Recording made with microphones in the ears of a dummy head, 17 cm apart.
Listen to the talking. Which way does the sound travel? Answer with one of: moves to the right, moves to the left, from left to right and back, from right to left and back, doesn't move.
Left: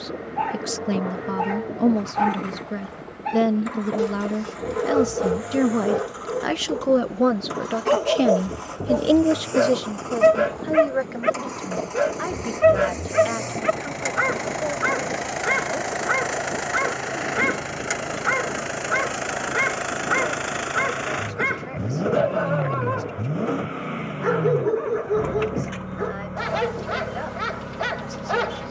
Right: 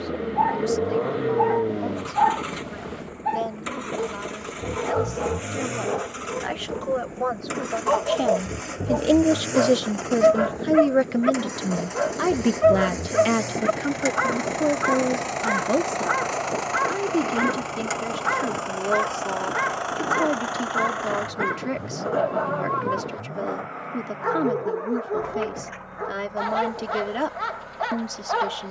moves to the right.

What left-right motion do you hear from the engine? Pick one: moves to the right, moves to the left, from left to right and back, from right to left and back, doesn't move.
moves to the left.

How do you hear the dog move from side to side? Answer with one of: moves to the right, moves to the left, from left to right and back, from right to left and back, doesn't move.
doesn't move.